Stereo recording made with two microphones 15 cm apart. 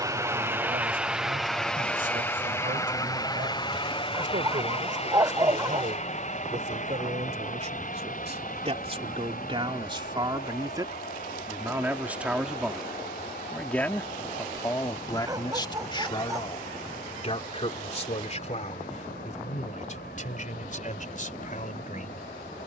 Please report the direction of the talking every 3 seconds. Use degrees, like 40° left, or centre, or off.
70° right, 60° right, 50° right, 30° right, 10° left, 30° left, 50° left, 60° left.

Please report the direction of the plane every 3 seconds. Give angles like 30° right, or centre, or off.
centre, 40° left, 50° left, 60° left, 70° left, 70° left, 70° left, 70° left.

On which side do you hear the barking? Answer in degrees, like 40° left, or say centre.
20° right.